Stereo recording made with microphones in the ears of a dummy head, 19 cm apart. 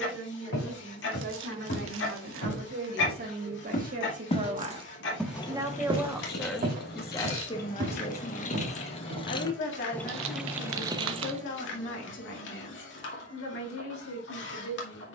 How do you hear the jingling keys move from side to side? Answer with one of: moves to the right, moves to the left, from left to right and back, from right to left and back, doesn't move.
from right to left and back.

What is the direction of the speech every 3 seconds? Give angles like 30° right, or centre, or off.
60° right, 30° right, 20° left, 60° left, 70° left.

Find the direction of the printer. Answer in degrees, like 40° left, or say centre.
60° left.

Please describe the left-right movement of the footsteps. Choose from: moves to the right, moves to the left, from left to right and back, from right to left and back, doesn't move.
moves to the right.